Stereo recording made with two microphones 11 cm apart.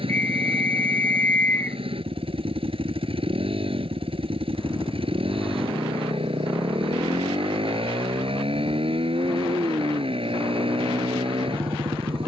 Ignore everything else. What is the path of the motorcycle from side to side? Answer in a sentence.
You can hear the motorcycle stay put.